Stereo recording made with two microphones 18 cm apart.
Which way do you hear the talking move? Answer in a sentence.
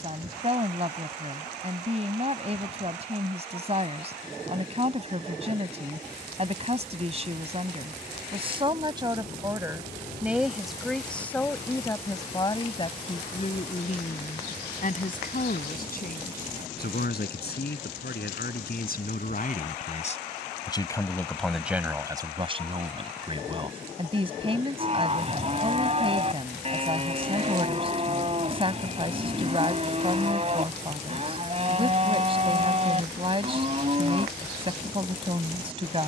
You can hear the talking move from right to left and back again.